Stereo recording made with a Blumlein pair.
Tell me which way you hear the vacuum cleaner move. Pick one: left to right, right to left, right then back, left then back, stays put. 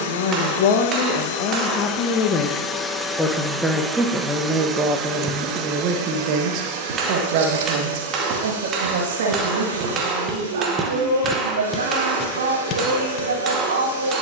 left to right.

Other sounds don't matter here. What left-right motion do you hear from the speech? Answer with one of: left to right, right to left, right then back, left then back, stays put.
left to right.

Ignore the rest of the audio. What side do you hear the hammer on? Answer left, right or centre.
right.